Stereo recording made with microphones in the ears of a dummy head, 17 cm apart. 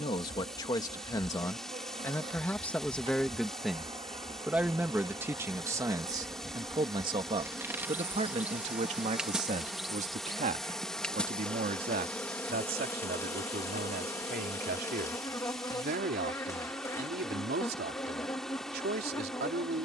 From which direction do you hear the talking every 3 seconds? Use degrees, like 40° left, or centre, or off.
20° left, 10° right, 30° right, 50° right, 60° right, 60° right, 60° right.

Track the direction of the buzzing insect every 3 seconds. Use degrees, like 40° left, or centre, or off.
40° right, 30° right, 10° right, centre, 10° left, 20° left, 20° left.